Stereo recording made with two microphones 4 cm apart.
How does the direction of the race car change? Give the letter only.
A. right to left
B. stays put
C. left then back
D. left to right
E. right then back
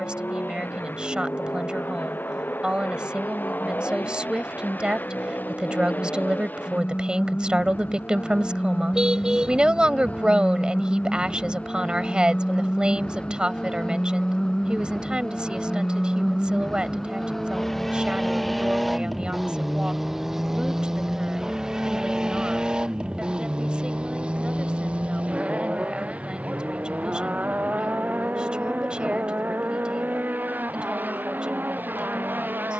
D.